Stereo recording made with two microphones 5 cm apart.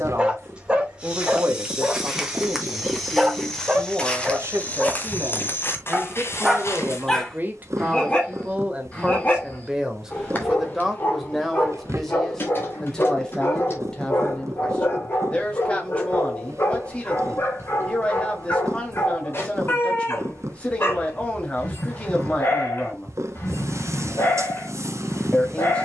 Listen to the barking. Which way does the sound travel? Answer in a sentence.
You can hear the barking travel towards the left.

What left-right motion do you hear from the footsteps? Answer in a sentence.
You can hear the footsteps move to the left.